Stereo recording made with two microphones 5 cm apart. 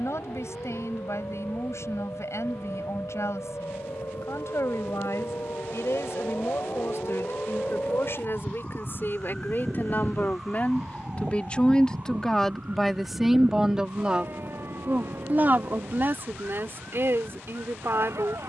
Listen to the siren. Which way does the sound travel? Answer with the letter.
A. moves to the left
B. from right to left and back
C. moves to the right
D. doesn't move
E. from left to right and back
C.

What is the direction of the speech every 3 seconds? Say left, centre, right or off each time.
left, left, left, left, centre, right.